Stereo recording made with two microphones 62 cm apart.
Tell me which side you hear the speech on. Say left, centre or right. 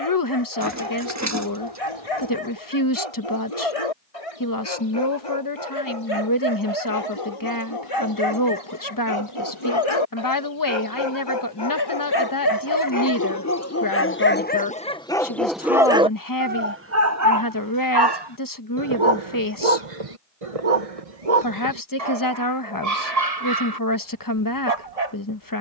left.